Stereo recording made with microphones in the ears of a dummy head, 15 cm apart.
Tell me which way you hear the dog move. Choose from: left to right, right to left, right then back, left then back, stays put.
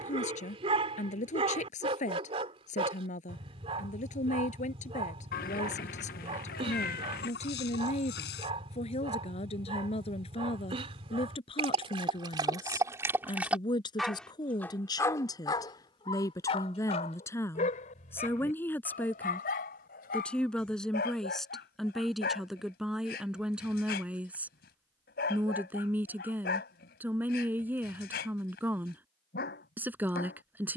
right to left.